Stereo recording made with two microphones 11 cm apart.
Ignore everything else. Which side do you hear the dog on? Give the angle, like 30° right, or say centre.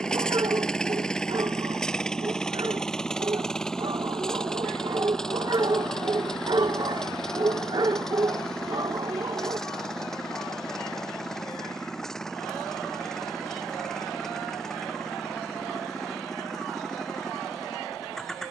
40° right.